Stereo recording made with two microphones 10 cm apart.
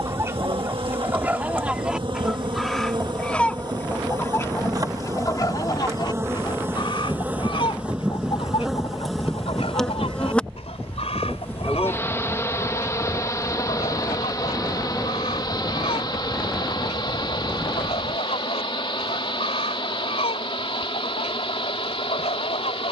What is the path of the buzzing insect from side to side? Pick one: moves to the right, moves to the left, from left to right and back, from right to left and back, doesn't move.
moves to the left.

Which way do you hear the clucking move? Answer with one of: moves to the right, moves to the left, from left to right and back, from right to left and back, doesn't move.
moves to the left.